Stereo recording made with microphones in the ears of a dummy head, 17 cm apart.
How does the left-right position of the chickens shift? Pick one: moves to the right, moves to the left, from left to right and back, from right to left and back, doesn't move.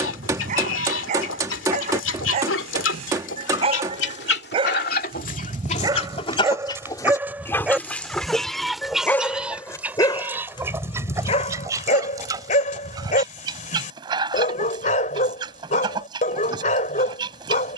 moves to the right.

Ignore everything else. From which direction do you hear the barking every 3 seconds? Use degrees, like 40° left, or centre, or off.
40° right, 30° right, 10° right, 30° left, 40° left, 40° left.